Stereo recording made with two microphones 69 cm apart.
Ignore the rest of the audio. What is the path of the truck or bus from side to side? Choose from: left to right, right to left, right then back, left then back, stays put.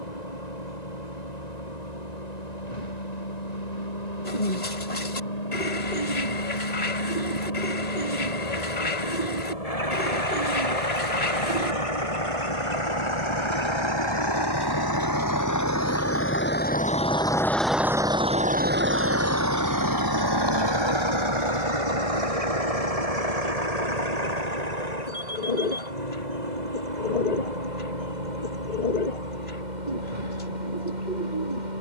left to right.